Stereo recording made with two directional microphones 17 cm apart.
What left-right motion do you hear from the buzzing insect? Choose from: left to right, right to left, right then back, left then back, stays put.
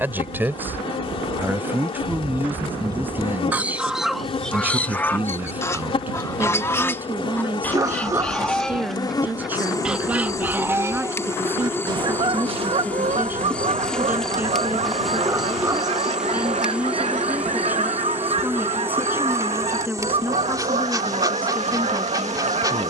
left to right.